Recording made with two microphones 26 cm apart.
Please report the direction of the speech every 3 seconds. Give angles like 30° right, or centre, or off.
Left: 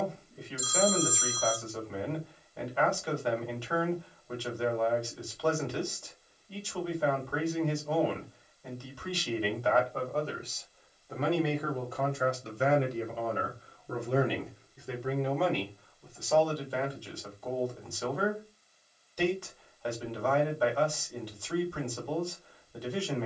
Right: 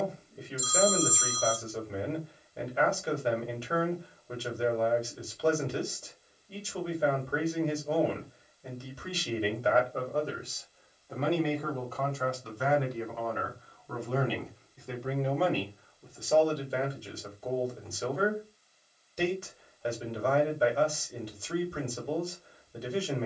20° right, 20° right, 20° right, 10° right, 20° left, 20° right, 20° right, 20° right.